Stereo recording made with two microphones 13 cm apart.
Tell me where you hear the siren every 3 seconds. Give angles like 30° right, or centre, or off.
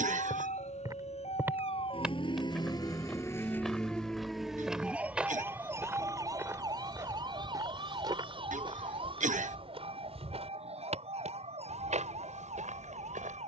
50° left, centre, 40° right, 50° right, 50° right.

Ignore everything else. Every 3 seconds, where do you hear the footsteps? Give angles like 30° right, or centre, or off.
10° right, centre, 30° right, 50° right, 70° right.